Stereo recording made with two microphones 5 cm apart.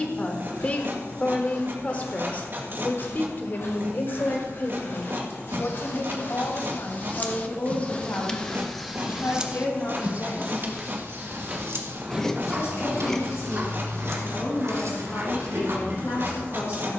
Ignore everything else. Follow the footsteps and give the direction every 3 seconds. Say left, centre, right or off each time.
left, left, left, centre, right, right.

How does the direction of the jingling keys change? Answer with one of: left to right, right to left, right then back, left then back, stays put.
left to right.